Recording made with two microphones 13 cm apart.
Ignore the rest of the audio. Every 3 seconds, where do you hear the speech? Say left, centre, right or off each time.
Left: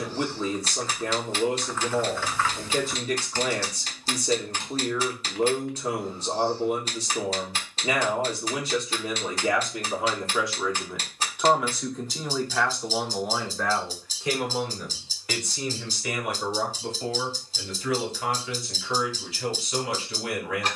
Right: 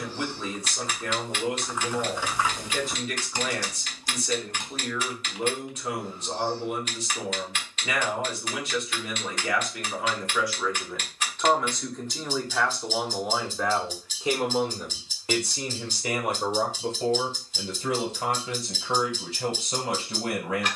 left, left, left, left, centre, right, right.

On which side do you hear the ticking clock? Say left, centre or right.
left.